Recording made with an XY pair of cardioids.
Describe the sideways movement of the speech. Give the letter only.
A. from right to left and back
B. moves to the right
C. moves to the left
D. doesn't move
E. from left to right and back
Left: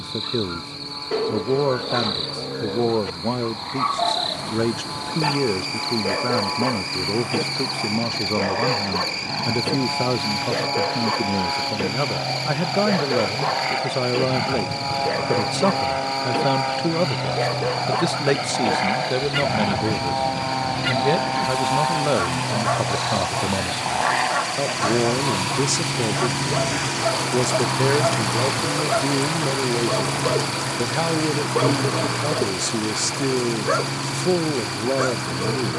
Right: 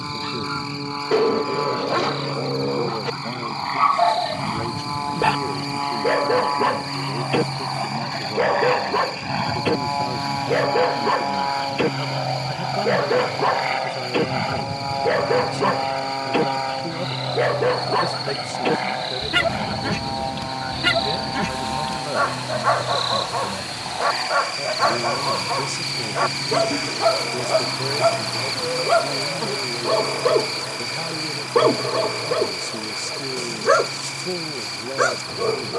D.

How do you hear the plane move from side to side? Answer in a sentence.
You can hear the plane move to the left.